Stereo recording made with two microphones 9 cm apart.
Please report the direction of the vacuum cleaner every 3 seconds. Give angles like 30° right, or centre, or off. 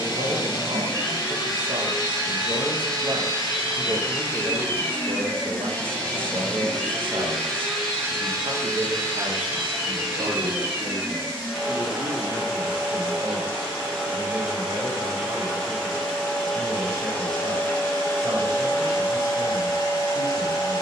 50° left, 30° left, centre, 10° right, centre, 10° left, 40° left.